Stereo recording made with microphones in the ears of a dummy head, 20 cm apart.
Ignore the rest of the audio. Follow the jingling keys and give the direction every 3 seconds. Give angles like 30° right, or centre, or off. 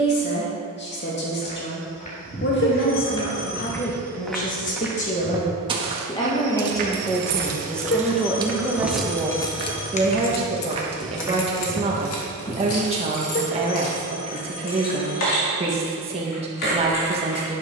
off, off, 30° right, 40° left, 70° left, 80° left.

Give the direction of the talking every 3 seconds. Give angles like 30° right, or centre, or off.
50° left, 40° left, 10° left, 20° right, 30° right, 30° right.